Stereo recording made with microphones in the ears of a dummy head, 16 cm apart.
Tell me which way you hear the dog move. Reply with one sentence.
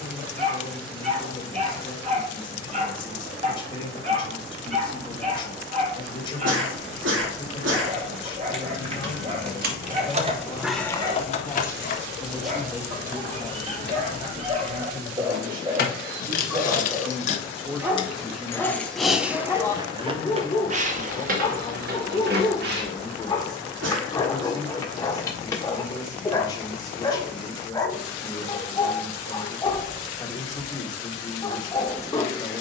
You can hear the dog move to the left.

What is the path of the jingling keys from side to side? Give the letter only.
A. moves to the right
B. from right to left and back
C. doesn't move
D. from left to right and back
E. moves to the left
B.